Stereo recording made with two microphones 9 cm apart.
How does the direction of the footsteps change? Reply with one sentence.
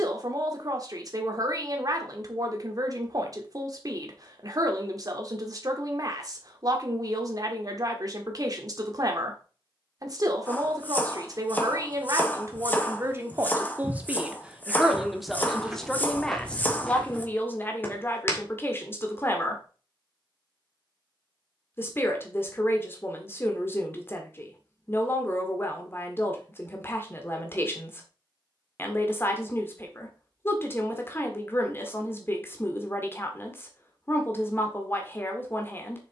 In this clip you hear the footsteps go from the right side to the left.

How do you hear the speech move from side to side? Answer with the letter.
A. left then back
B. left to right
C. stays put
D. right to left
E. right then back
D.